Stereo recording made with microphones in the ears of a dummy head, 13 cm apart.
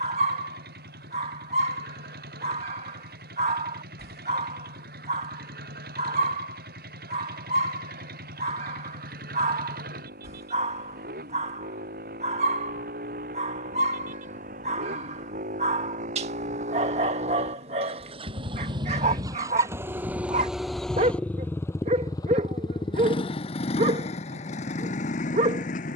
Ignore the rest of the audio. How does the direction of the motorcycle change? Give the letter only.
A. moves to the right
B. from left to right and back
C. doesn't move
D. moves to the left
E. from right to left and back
D.